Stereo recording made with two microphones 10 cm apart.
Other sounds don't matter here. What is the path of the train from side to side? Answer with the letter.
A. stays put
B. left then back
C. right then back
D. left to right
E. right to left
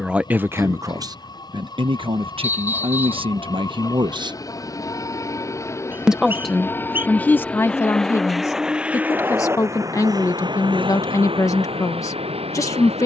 D.